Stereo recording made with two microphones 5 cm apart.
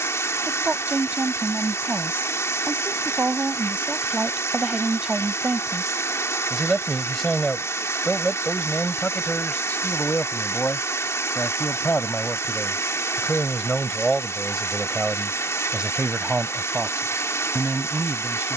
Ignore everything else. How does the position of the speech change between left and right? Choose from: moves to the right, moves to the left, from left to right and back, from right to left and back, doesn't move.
from right to left and back.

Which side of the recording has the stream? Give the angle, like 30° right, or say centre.
80° left.